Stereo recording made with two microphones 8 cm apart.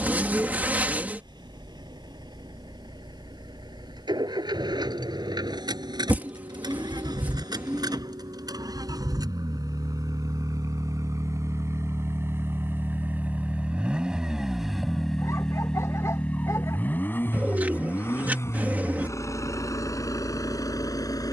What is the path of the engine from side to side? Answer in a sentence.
In this clip you hear the engine move to the left.